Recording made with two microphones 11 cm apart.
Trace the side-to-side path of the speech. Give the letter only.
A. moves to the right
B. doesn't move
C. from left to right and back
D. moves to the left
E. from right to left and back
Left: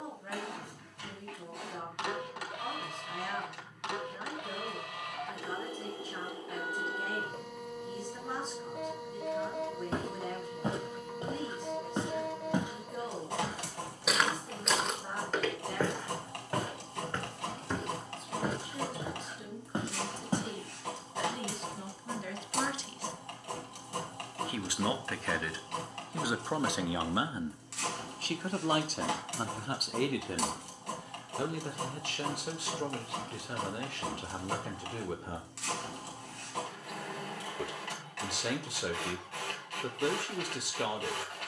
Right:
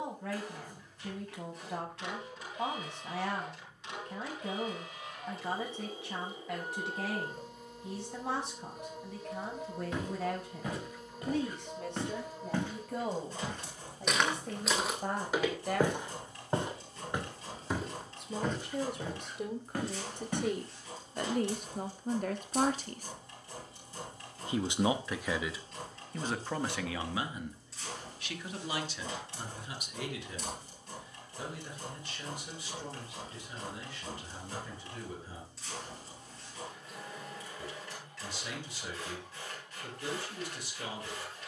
D.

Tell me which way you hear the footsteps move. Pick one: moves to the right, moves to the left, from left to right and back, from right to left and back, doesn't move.
from left to right and back.